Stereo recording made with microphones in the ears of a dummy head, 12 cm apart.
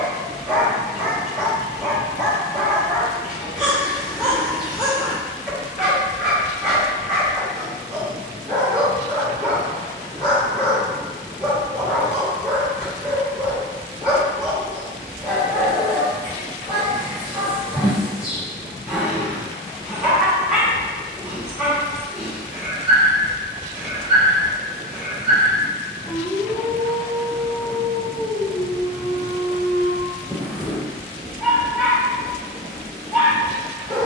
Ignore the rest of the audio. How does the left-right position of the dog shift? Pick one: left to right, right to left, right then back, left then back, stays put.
stays put.